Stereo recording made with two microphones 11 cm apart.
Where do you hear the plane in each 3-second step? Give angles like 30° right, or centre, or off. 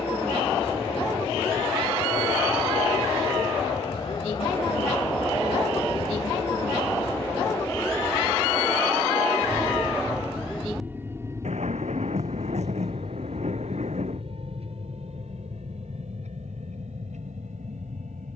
50° left, 50° left, 20° left, 10° right, 50° right, 70° right.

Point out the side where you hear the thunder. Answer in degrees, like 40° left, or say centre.
80° right.